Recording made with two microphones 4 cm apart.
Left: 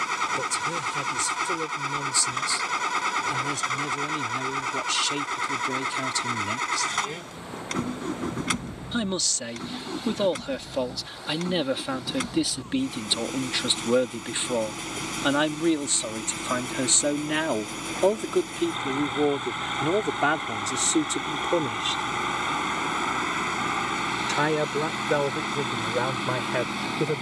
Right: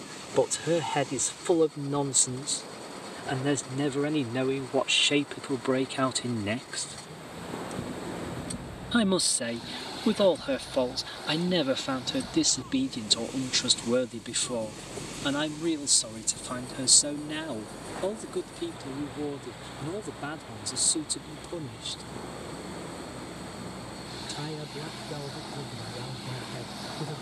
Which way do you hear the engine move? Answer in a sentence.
You can hear the engine stay in one place.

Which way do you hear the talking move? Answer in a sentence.
In this clip you hear the talking move to the left.